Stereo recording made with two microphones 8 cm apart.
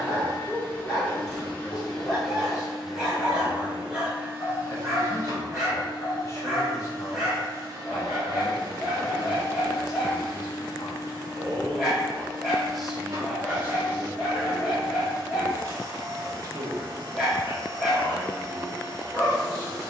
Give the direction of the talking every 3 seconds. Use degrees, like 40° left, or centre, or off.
40° left, 40° left, 40° left, 30° left, 20° right, 50° right, 50° right.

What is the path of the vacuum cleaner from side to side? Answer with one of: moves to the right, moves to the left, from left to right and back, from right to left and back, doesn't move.
moves to the right.